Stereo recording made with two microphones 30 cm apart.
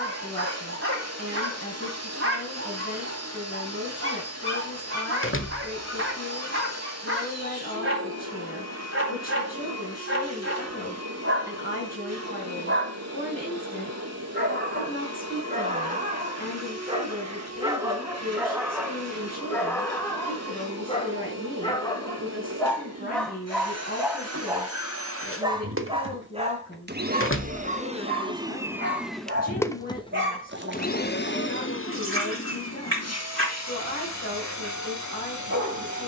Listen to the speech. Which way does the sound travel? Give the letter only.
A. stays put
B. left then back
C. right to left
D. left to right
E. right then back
A.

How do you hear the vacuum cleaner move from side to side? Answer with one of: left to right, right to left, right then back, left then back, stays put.
right to left.